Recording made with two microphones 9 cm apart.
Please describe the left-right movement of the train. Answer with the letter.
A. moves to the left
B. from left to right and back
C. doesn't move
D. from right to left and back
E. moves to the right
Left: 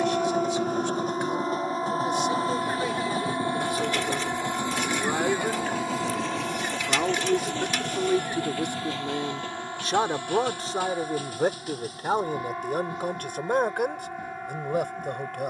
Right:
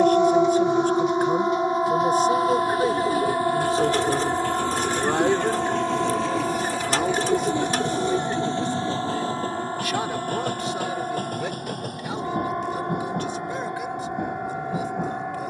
E.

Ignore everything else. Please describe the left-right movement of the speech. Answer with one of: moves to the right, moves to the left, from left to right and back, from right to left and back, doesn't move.
moves to the left.